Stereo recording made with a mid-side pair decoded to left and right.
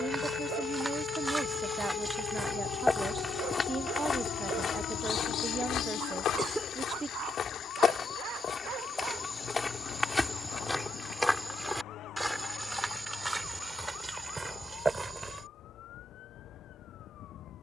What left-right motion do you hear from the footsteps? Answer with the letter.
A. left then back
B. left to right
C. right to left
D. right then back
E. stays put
A.